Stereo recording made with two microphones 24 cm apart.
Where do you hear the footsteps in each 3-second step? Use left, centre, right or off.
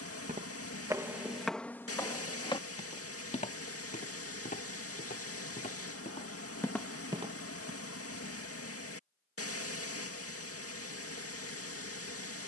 centre, left, centre, off.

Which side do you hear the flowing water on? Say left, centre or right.
left.